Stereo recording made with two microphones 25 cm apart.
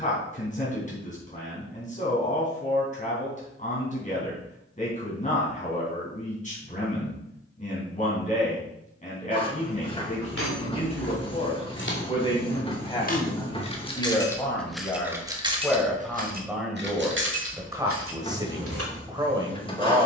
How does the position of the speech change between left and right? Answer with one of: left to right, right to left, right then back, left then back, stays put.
left to right.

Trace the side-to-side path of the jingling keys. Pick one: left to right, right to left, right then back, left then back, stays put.
left to right.